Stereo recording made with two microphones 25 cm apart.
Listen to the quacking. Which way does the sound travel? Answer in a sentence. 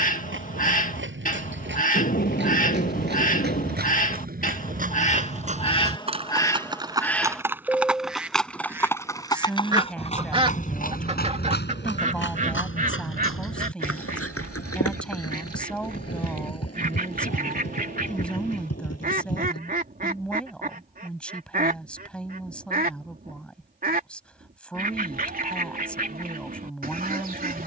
In this clip you hear the quacking move from left to right.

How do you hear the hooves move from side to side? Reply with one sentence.
You can hear the hooves go from the right side to the left.